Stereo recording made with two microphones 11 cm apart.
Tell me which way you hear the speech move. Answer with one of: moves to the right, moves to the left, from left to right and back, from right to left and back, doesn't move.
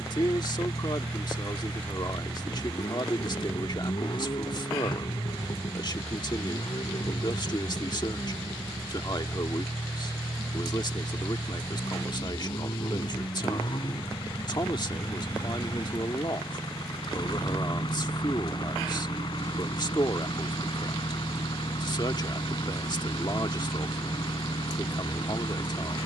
doesn't move.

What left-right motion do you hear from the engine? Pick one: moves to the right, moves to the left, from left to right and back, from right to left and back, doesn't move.
doesn't move.